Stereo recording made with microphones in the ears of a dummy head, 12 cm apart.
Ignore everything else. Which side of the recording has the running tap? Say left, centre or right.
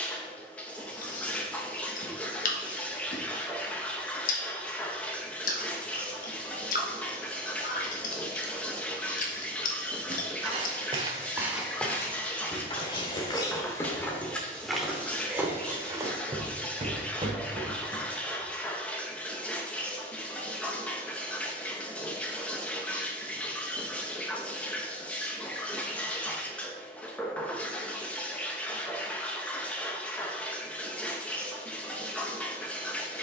centre.